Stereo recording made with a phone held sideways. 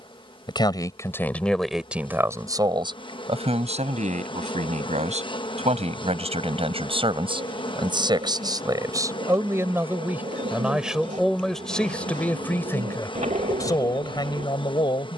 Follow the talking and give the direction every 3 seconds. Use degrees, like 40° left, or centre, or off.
centre, 50° right, 30° right, 10° right, 20° left.